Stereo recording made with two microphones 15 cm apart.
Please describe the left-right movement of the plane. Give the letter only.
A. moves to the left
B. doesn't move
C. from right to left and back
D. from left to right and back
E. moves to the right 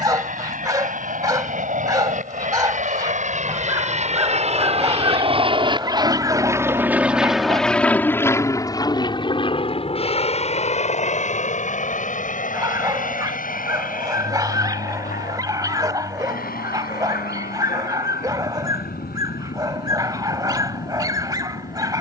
A.